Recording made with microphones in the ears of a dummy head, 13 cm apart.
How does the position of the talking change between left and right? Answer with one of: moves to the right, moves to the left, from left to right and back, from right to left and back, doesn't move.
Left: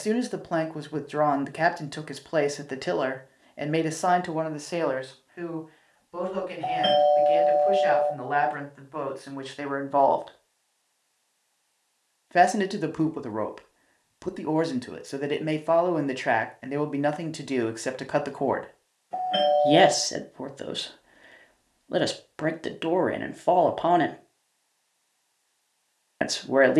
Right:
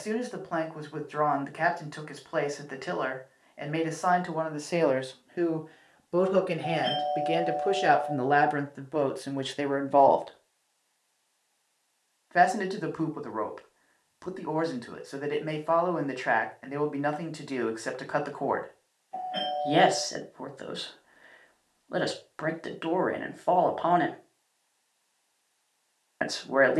from left to right and back.